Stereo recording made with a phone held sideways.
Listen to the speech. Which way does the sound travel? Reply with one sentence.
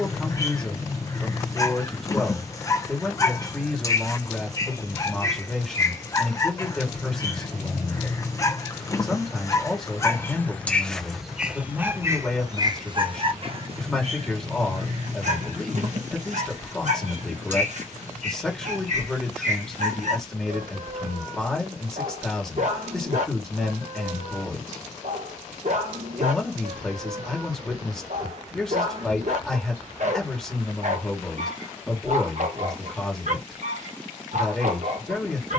In this clip you hear the speech stay put.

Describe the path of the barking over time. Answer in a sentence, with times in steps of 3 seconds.
You can hear the barking on the left from 0 s, in the centre from 9 s and on the right from 12 s.